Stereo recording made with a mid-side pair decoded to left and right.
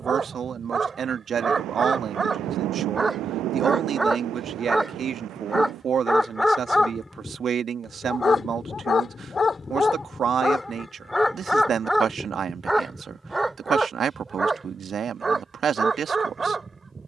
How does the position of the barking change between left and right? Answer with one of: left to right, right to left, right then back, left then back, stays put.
left then back.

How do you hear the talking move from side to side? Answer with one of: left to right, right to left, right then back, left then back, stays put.
stays put.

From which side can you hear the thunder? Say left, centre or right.
right.